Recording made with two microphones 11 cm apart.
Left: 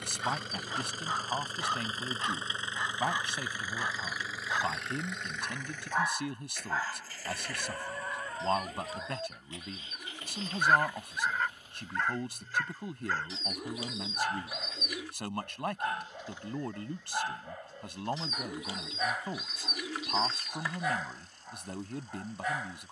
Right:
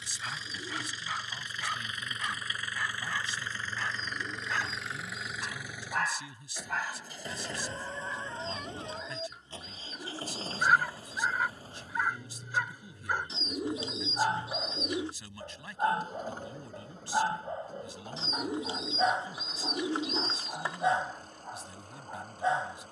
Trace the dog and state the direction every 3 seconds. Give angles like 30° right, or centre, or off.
30° left, 20° left, 10° left, centre, 20° right, 30° right, 30° right, 30° right.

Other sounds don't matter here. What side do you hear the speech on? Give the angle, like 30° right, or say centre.
60° left.